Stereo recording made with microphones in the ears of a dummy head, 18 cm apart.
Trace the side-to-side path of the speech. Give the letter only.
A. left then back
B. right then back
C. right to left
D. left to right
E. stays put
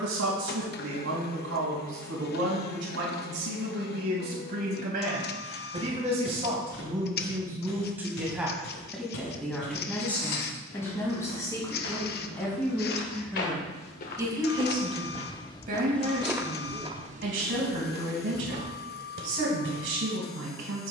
A.